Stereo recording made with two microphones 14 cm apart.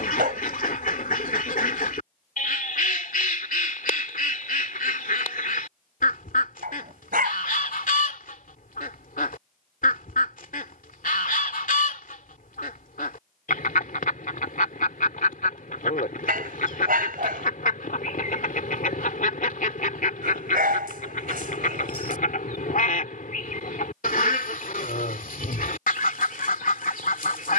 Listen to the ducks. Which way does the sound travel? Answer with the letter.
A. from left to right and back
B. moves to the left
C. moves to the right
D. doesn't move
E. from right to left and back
D.